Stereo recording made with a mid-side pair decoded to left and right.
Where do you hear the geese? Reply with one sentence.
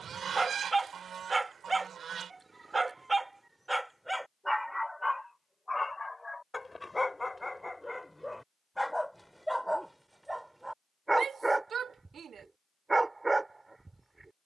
In this clip you hear the geese on the right.